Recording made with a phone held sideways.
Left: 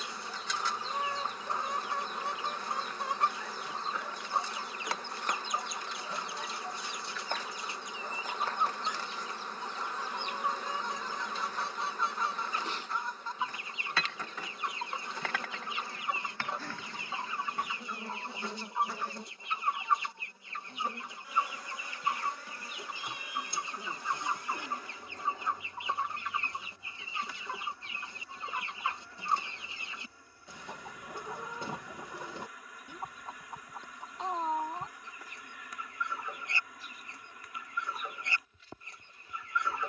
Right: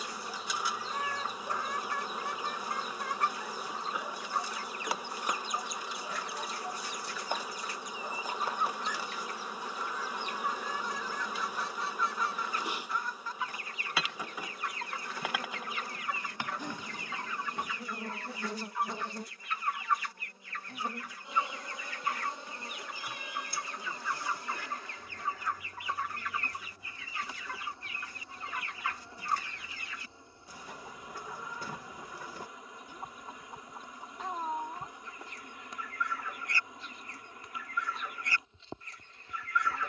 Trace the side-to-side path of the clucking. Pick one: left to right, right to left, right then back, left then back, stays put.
stays put.